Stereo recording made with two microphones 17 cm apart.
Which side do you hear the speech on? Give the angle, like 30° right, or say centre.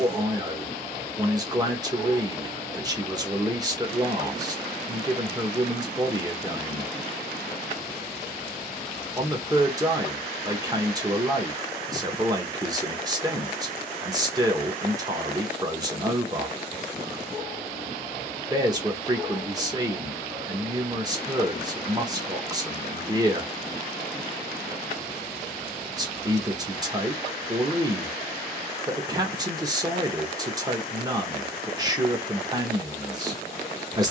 20° right.